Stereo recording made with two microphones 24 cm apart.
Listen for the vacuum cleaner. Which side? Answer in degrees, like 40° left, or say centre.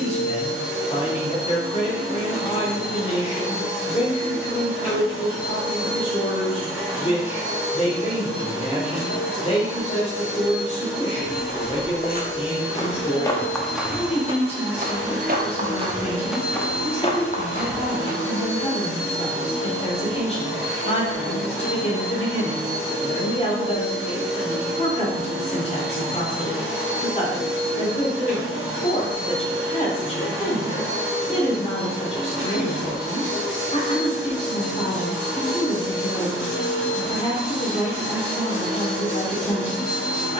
70° left.